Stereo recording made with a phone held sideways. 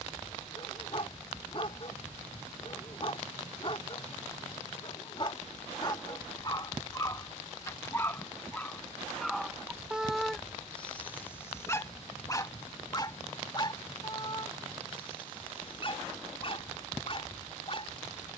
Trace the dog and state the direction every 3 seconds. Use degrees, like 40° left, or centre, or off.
40° left, 40° left, 20° left, 10° left, 30° left, 40° left.